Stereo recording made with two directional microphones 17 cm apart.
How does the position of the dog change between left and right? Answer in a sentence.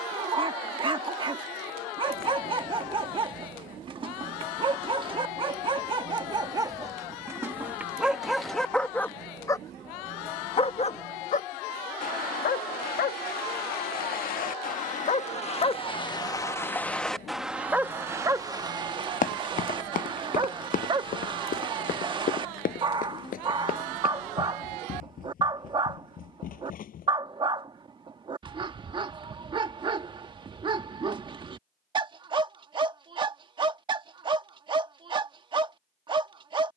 In this clip you hear the dog go left and come back.